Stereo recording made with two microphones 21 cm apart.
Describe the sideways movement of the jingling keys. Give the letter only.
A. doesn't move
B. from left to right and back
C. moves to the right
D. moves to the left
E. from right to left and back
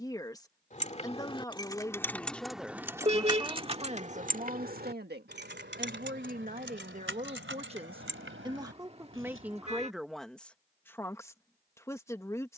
C.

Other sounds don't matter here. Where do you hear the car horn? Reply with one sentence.
You can hear the car horn on the right.